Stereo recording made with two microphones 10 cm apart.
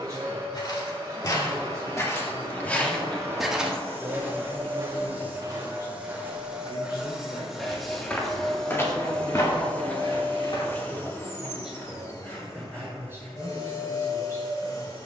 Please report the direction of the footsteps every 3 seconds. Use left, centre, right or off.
left, right, centre, left, off.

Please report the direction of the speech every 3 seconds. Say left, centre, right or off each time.
right, centre, left, left, right.